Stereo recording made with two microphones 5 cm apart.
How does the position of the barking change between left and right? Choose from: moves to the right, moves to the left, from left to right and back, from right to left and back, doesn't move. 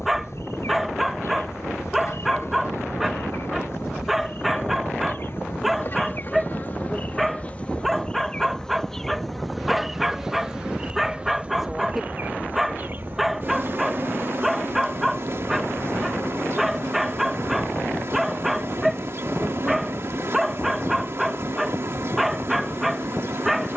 doesn't move.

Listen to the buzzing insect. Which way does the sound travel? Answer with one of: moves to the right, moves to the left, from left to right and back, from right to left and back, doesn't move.
moves to the right.